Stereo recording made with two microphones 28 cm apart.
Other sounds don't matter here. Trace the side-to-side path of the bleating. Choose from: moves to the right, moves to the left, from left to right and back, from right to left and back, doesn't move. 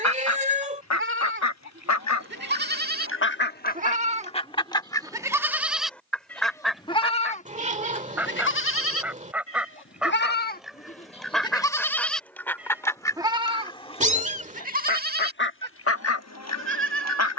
from right to left and back.